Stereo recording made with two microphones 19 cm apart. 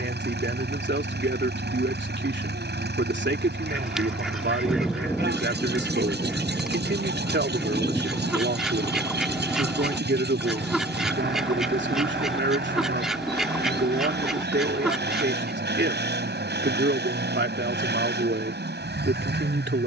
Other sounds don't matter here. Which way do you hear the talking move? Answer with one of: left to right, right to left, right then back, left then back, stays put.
stays put.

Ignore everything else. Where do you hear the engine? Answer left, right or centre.
right.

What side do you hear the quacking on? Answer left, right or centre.
centre.